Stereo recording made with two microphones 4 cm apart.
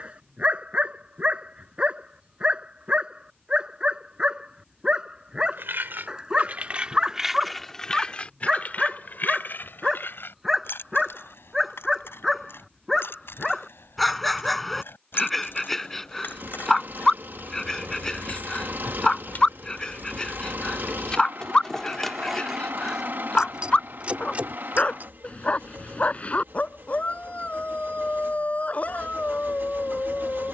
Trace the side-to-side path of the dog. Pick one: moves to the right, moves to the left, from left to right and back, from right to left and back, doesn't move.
moves to the left.